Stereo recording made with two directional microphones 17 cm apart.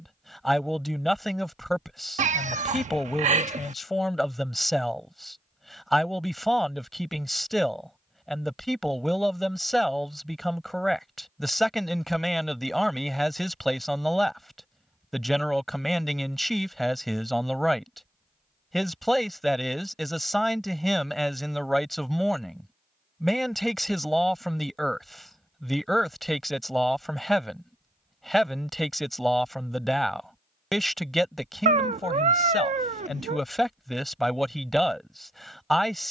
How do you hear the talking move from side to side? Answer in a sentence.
You can hear the talking stay put.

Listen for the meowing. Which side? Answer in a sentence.
In this clip you hear the meowing on the right.